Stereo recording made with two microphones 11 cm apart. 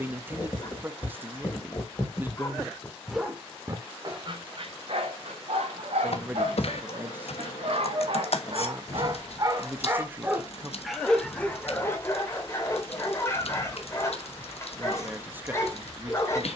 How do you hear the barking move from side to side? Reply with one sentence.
In this clip you hear the barking move from left to right and back again.